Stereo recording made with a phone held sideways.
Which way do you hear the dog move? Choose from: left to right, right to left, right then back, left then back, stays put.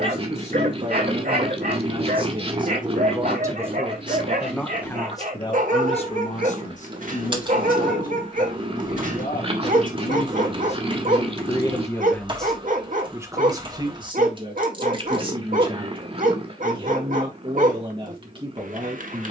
stays put.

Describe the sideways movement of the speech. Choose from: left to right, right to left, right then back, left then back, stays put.
left then back.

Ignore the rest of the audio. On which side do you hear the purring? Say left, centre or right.
right.